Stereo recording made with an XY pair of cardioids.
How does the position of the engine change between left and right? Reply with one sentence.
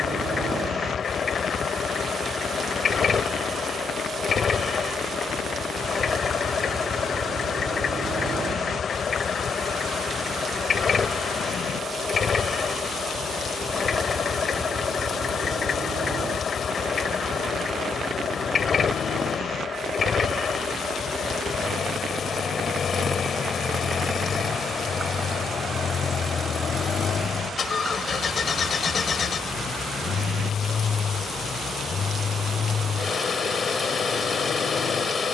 You can hear the engine stay in one place.